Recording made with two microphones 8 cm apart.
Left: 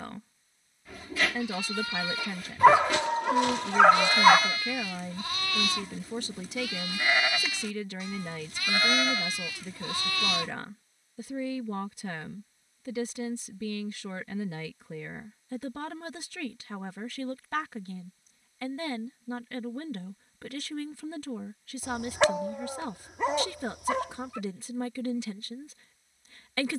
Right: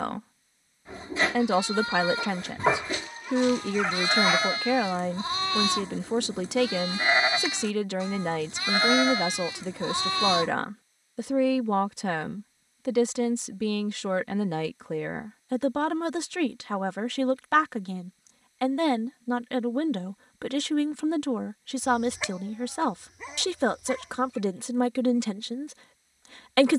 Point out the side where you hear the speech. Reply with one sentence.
In this clip you hear the speech on the right.